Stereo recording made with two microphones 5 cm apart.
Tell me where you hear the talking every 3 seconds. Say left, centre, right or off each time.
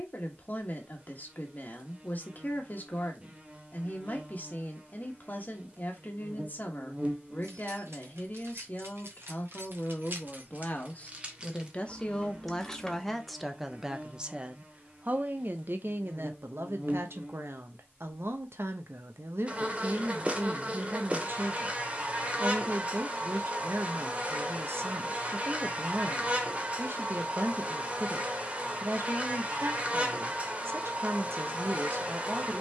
left, left, left, left, centre, right, right, right, right, right, right.